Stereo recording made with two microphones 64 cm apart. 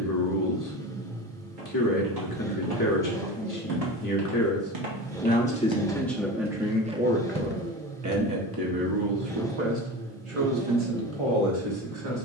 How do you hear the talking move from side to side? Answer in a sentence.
You can hear the talking travel towards the right.